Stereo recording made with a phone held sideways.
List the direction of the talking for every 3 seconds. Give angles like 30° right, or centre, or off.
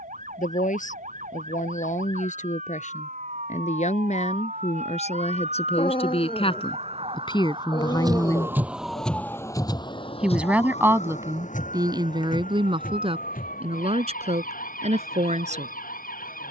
70° left, 60° left, 40° left, 20° right, 40° right, 60° right.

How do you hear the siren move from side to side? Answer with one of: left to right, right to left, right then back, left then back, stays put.
right to left.